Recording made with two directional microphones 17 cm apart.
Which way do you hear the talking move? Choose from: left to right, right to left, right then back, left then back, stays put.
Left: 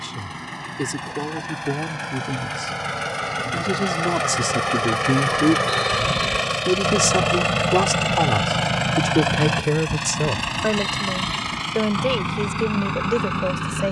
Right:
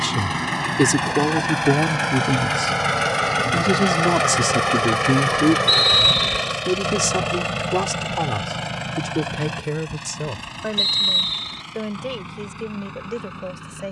right to left.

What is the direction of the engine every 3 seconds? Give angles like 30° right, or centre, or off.
50° right, 20° right, 30° left, 50° left, 60° left.